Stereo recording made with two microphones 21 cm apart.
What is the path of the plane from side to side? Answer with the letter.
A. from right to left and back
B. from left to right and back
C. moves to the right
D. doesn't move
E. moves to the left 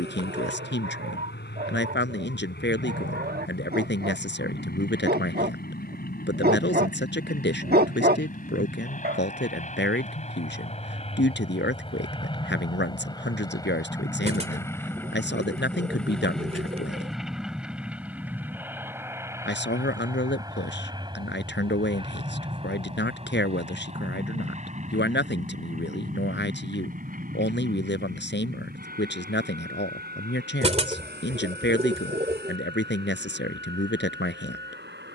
C.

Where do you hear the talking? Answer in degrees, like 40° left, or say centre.
60° left.